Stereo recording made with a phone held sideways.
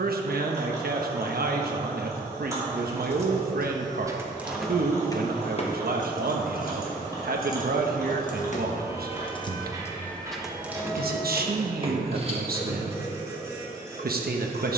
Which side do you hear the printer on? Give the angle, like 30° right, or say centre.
20° right.